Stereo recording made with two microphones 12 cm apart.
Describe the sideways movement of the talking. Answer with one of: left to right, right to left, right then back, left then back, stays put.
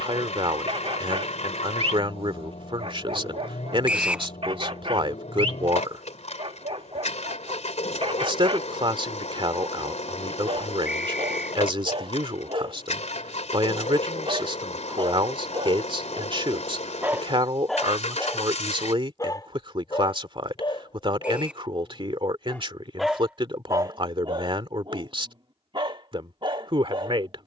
stays put.